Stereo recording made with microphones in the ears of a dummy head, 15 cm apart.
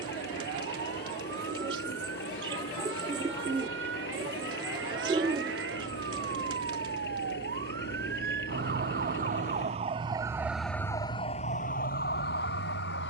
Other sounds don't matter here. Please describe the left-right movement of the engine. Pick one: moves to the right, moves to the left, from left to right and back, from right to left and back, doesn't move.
doesn't move.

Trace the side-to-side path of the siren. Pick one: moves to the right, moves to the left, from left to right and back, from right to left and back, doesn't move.
moves to the left.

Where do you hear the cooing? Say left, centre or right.
right.